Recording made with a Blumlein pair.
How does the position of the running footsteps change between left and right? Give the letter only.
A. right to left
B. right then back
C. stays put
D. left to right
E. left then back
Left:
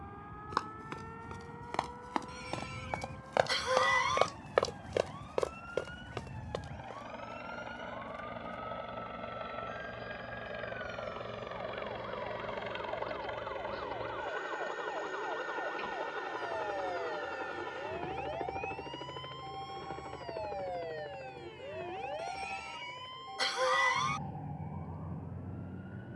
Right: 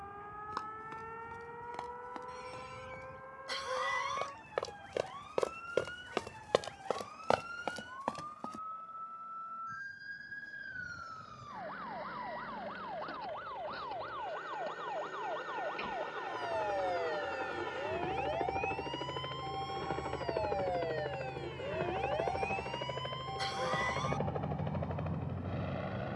D.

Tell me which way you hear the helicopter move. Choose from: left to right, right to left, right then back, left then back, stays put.
left to right.